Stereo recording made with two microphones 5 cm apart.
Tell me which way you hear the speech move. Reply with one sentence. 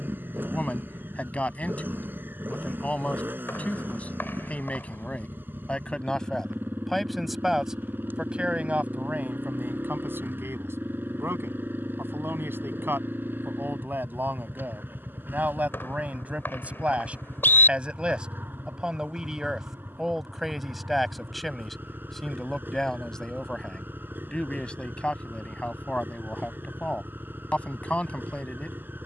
You can hear the speech move from left to right and back again.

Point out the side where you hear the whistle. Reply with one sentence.
In this clip you hear the whistle on the left.